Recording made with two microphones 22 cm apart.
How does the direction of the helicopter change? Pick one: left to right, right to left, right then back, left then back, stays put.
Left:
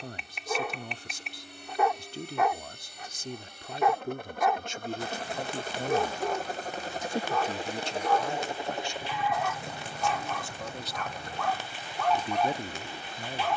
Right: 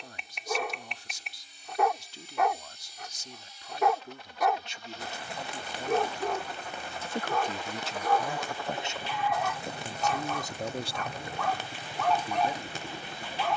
left to right.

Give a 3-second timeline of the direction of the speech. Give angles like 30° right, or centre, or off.
50° left, 50° left, centre, 30° right, 40° left.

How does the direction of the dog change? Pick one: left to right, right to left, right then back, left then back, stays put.
stays put.